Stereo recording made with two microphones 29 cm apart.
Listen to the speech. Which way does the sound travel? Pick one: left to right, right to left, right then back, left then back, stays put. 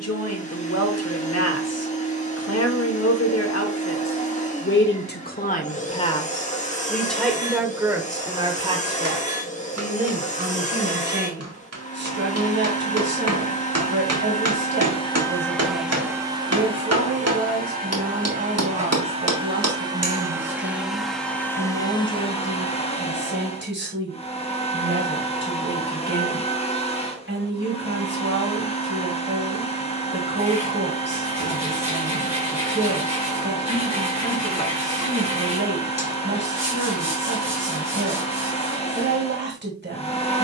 left to right.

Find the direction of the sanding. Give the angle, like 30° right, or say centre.
20° right.